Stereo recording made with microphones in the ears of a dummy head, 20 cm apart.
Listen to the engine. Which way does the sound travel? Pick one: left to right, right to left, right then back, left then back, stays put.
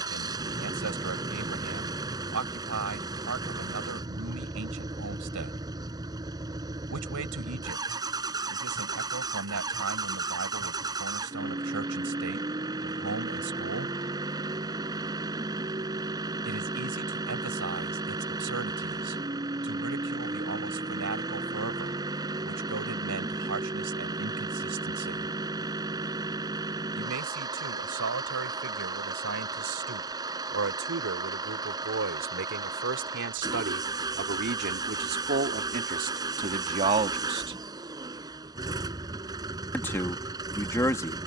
stays put.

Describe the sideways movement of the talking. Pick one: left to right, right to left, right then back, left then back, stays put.
right to left.